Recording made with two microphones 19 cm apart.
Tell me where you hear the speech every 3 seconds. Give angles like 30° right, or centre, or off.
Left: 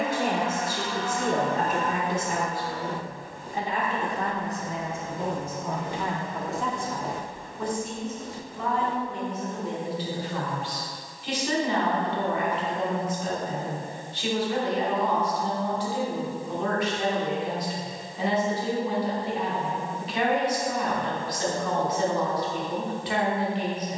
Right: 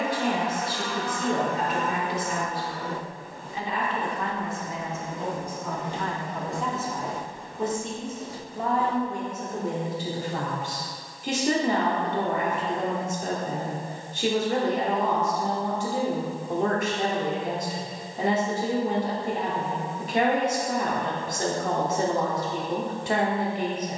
50° left, 40° left, 20° right, 50° right, 50° right, 50° right, 50° right, 50° right.